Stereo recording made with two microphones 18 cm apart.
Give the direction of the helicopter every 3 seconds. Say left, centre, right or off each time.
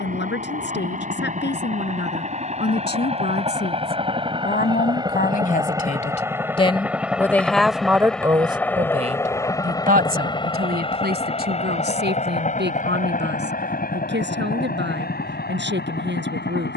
right, right, centre, left, left, left.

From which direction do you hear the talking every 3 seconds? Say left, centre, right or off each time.
left, left, centre, right, right, right.